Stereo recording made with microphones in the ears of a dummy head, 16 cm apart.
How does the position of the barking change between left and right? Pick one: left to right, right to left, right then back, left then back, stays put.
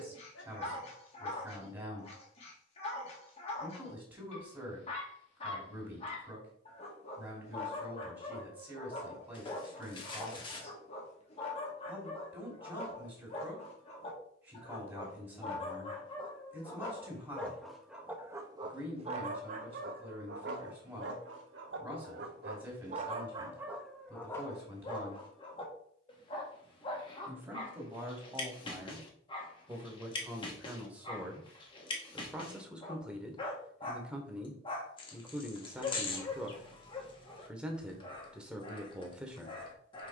right then back.